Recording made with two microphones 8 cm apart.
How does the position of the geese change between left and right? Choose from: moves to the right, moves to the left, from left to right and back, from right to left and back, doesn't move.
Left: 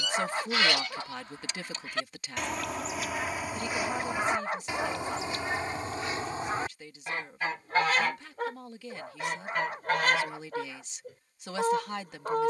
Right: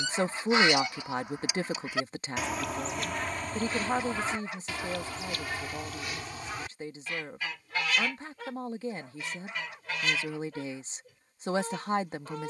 moves to the left.